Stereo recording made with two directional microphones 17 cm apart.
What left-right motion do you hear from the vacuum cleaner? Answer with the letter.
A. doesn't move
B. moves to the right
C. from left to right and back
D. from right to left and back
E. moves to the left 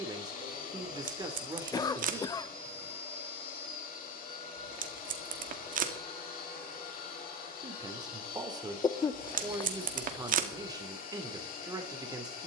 A.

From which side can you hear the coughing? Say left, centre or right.
left.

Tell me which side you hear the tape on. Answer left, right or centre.
right.